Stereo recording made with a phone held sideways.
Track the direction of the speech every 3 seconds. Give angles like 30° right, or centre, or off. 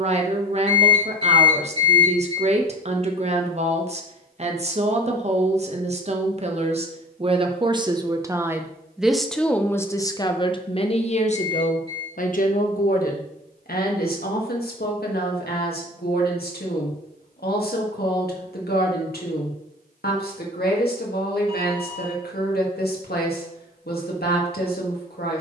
40° right, 40° right, 30° right, 30° left, 70° left, 80° left, 80° left, 80° left, 80° left.